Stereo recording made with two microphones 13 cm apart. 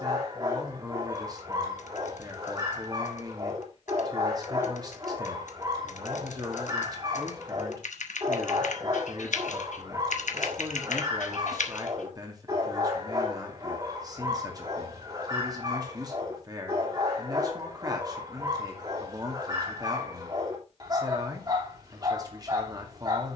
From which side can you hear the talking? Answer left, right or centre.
right.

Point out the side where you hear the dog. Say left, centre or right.
right.